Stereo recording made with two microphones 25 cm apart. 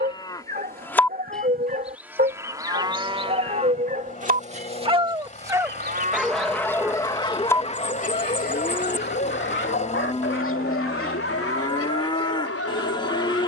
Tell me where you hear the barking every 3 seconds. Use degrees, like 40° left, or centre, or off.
40° right, 30° right, 20° left, 50° left, 60° left.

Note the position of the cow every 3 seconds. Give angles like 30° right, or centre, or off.
centre, 30° right, centre, 20° left, 20° left.